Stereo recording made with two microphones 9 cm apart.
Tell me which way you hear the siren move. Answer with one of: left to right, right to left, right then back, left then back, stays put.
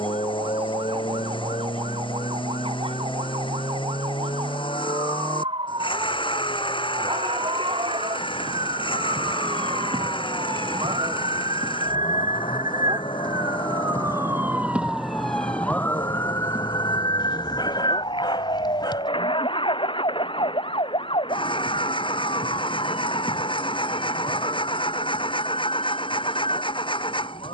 right to left.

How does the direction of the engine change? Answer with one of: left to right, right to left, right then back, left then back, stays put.
stays put.